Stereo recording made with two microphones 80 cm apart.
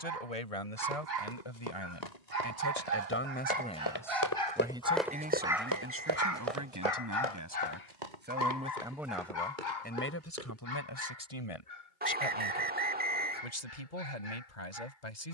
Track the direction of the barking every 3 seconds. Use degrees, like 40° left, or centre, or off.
60° right, 30° right, 50° left, 70° left, 80° left.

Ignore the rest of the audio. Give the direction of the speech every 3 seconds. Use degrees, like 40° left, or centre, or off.
40° left, centre, 20° right, 20° left, 60° left.